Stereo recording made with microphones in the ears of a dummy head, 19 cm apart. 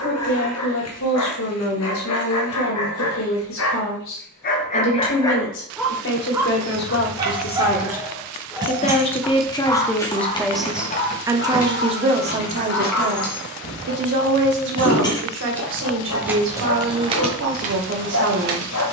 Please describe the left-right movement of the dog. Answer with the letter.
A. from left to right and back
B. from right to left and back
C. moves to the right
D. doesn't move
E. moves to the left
A.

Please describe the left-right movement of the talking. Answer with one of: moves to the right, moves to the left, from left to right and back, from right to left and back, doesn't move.
moves to the right.